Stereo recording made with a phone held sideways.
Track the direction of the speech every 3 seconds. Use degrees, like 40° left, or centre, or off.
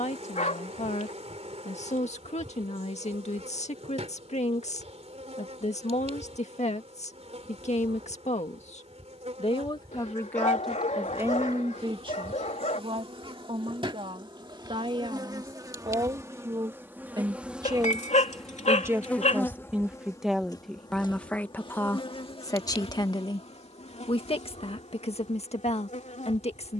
60° left, 60° left, 60° left, centre, 50° right, 40° right, 10° right, 20° left, 50° left.